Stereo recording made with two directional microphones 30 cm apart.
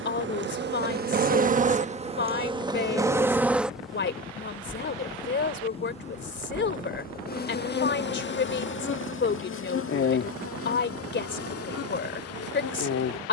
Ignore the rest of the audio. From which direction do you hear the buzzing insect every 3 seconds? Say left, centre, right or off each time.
right, centre, left, left, left.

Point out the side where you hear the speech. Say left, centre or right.
left.